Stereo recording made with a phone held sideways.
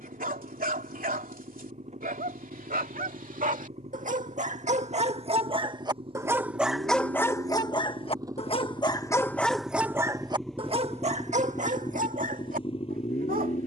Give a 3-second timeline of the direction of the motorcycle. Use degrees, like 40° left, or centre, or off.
50° right, 40° right, 30° right, centre, 40° left.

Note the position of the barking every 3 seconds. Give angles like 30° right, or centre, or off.
70° right, 50° right, 20° left, 30° right, 60° right.